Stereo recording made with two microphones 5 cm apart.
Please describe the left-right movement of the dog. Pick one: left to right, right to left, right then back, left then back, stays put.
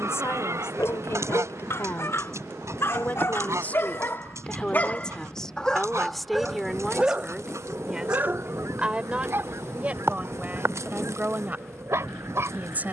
left to right.